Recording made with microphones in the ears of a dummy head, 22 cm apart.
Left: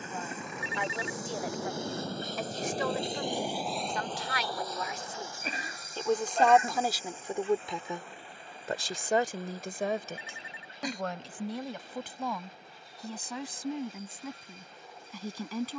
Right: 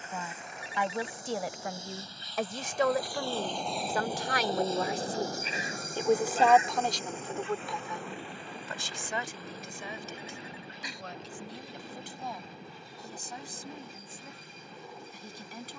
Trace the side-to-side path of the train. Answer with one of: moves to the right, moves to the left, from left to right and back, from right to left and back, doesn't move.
moves to the right.